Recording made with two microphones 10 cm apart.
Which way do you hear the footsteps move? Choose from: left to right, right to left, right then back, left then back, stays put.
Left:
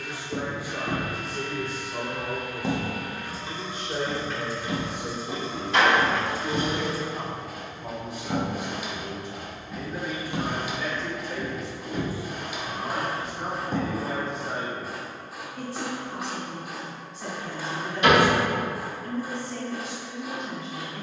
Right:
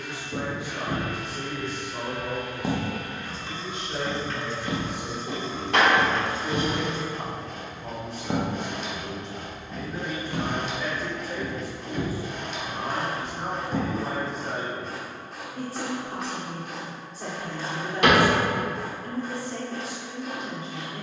right then back.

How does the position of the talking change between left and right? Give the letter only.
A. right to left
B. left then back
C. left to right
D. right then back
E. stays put
C.